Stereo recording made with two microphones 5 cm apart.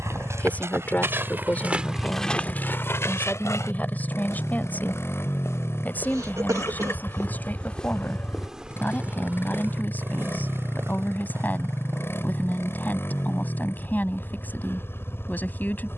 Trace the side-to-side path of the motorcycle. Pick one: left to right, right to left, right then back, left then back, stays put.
stays put.